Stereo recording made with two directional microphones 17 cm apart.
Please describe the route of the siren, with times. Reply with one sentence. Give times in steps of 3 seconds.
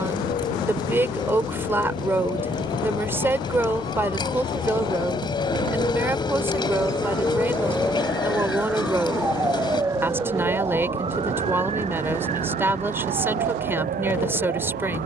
You can hear the siren on the left from 0 s, in the centre from 6 s and on the right from 9 s.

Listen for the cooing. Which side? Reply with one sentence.
You can hear the cooing on the left.